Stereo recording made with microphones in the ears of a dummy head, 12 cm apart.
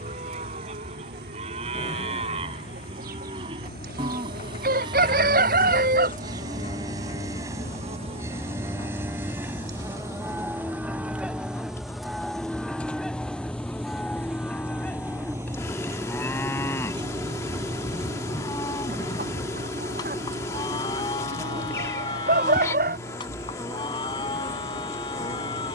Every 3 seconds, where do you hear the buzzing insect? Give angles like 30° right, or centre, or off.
80° right, 70° right, 50° right, 20° right, 10° left, 20° left, 20° left, 20° left, 20° left.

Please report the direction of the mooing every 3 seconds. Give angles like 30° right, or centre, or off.
40° right, 40° right, 20° right, 10° right, centre, 20° left, 30° left, 30° left, 30° left.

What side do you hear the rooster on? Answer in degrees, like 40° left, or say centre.
70° right.